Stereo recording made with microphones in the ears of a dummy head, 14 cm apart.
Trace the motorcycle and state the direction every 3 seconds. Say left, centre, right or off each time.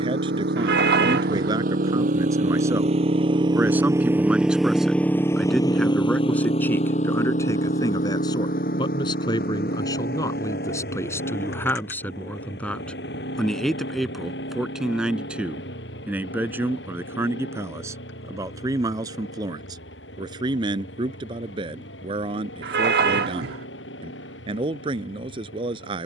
right, centre, left, left, left, left, left, left, left.